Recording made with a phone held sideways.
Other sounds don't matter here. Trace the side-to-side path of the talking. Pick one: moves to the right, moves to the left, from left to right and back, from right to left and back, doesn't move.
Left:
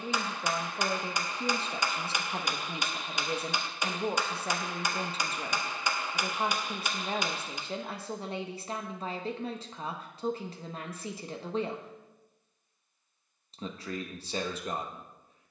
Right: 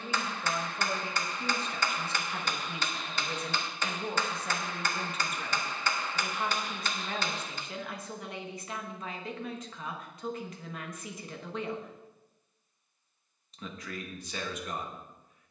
doesn't move.